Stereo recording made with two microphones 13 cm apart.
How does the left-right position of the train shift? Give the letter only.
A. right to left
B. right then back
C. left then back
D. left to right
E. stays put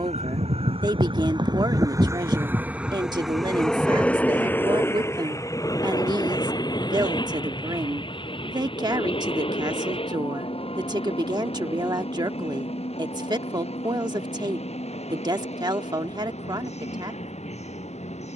A.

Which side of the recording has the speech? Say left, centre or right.
right.